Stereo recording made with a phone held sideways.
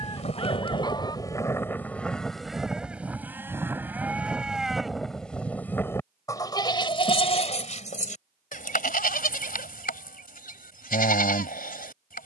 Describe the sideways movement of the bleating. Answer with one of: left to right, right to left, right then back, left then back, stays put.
right then back.